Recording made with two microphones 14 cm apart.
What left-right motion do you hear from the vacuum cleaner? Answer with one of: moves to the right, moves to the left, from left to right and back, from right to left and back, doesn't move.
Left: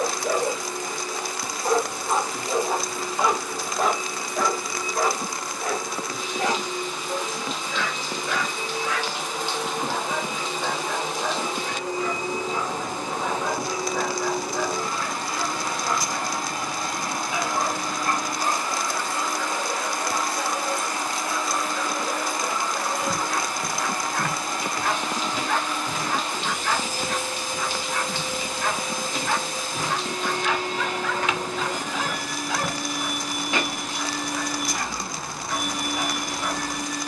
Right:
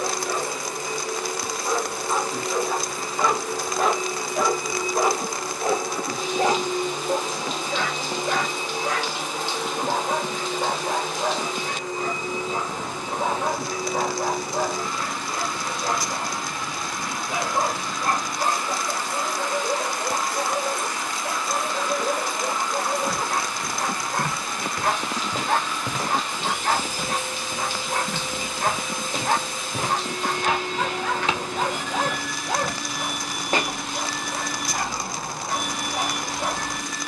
moves to the left.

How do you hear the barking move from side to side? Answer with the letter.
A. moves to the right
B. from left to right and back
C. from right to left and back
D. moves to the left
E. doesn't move
A.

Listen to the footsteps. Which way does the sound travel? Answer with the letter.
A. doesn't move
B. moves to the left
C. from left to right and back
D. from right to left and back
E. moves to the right
C.